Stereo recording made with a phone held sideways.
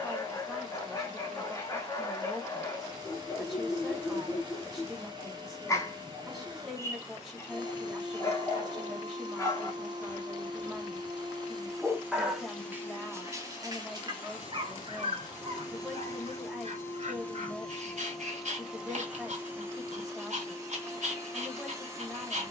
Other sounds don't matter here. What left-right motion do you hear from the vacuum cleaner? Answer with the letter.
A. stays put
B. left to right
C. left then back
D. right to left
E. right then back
C.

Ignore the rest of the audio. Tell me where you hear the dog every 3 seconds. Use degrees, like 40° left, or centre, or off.
20° left, 20° left, 20° left, 10° left, 30° right, 50° right, 60° right, 60° right.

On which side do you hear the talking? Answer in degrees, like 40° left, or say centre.
centre.